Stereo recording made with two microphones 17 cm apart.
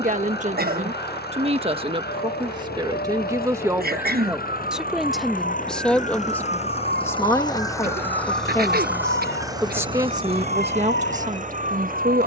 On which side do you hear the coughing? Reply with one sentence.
You can hear the coughing on the right.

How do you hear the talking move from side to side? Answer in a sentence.
In this clip you hear the talking go left and come back.